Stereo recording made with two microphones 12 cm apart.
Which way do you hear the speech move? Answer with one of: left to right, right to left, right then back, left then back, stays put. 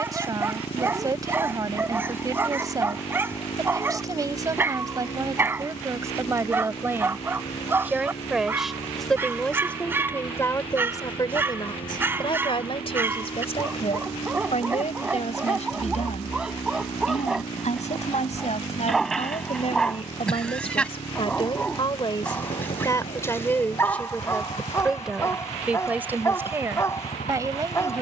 left then back.